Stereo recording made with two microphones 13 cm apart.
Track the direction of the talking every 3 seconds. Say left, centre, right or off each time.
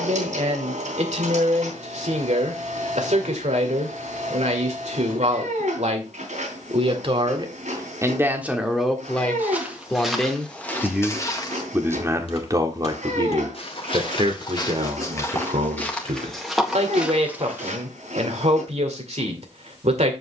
right, right, right, centre, right, right, right.